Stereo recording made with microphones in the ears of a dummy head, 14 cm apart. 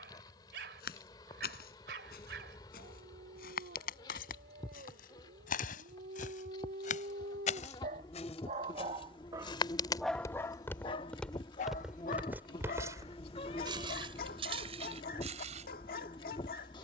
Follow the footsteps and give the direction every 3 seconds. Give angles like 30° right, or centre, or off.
70° left, 70° left, 50° left, 20° left, 30° right, 50° right.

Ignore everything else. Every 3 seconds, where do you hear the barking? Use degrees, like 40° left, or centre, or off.
70° right, 70° right, 60° right, 20° left, 60° left, 60° left.